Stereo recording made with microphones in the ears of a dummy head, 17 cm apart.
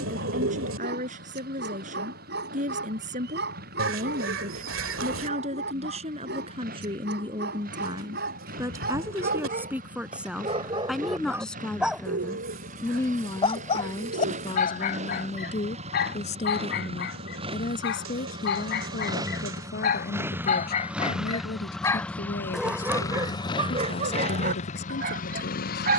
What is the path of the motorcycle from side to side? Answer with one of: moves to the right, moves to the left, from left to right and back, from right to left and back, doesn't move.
moves to the left.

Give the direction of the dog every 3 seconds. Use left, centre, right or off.
right, right, right, right, left, left, left, centre, right.